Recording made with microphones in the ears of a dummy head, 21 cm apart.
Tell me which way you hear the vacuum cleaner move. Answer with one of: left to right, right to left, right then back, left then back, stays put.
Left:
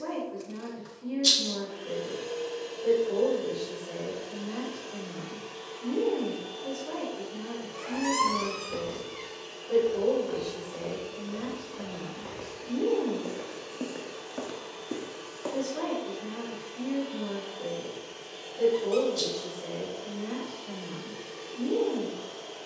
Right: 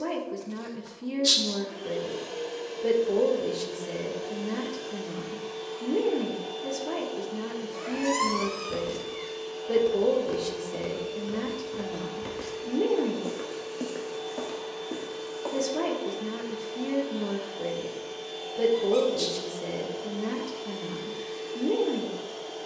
stays put.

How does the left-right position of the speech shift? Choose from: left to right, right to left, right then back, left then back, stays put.
stays put.